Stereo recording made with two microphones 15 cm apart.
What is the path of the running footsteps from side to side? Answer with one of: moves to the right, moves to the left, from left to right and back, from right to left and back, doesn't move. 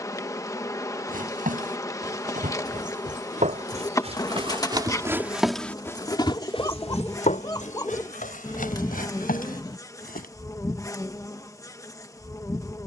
moves to the left.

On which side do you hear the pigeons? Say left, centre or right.
left.